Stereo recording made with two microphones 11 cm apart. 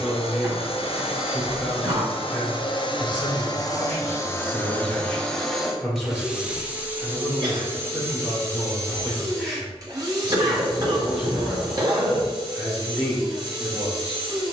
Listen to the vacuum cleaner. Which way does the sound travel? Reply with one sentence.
You can hear the vacuum cleaner move from left to right.